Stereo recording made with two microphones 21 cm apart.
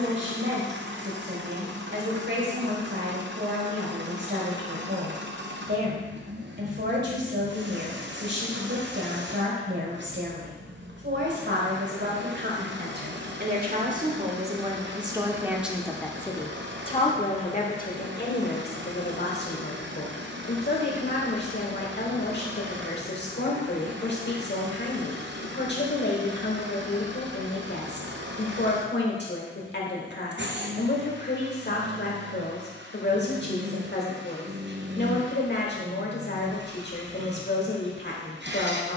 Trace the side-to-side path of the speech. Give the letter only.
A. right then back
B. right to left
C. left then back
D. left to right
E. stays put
B.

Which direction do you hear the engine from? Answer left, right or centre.
right.